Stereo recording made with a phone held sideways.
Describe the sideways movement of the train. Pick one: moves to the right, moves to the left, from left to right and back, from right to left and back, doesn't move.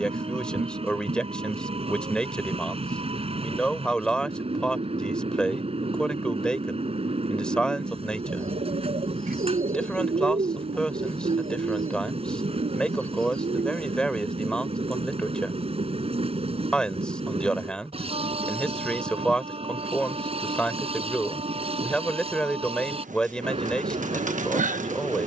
doesn't move.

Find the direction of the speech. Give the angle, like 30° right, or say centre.
10° left.